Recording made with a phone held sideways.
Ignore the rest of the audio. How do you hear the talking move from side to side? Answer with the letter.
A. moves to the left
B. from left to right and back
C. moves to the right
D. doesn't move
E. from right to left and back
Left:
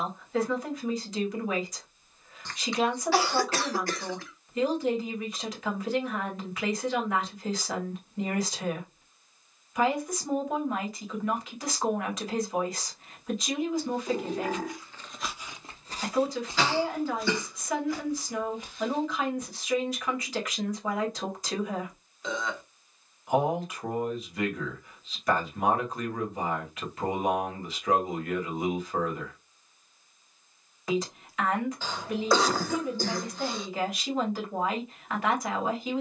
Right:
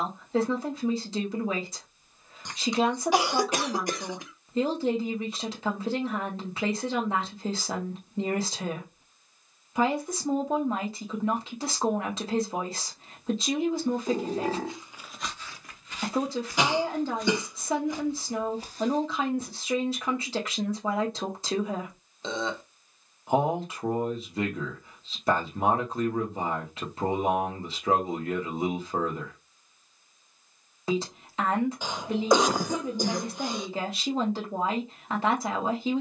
D.